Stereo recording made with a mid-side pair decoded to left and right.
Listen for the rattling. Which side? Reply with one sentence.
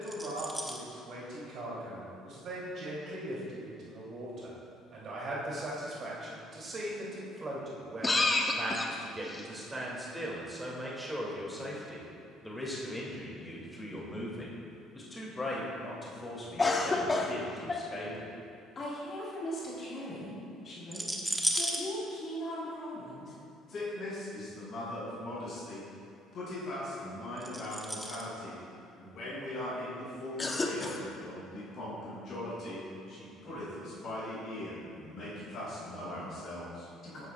In this clip you hear the rattling in the centre.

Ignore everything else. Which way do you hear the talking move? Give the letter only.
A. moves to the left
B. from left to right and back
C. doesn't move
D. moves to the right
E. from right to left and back
A.